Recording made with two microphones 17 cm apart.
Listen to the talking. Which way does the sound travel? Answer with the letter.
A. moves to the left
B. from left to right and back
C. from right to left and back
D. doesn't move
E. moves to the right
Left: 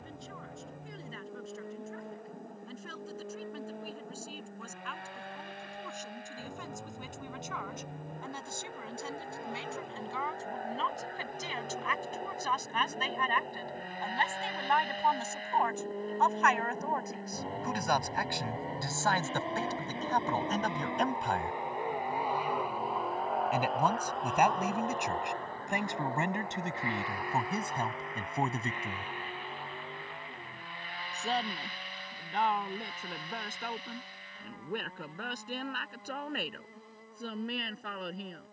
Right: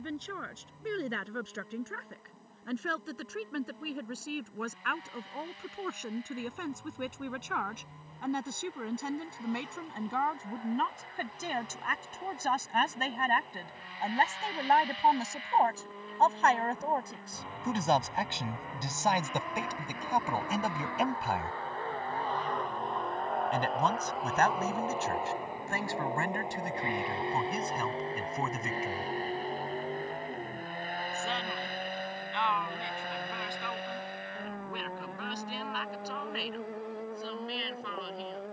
A.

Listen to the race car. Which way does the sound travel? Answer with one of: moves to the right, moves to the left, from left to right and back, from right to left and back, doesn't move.
moves to the right.